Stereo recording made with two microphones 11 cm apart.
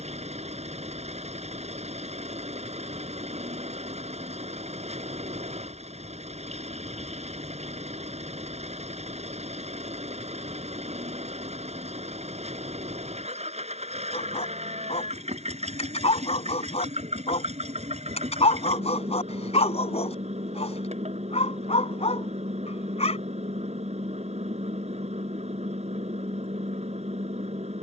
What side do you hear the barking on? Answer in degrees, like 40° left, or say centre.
70° left.